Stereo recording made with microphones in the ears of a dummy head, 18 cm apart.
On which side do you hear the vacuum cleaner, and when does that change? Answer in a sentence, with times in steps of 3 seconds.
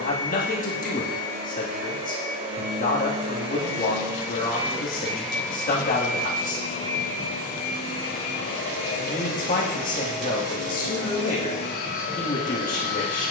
In this clip you hear the vacuum cleaner on the right from 0 s, in the centre from 3 s and on the left from 6 s.